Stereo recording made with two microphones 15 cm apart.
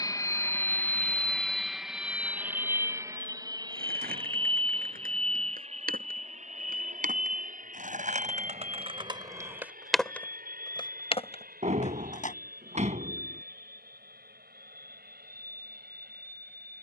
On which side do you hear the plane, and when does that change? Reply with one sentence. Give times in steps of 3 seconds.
You can hear the plane in the centre from 0 s and on the right from 3 s.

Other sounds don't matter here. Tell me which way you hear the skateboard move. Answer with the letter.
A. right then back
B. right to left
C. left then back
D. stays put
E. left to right
B.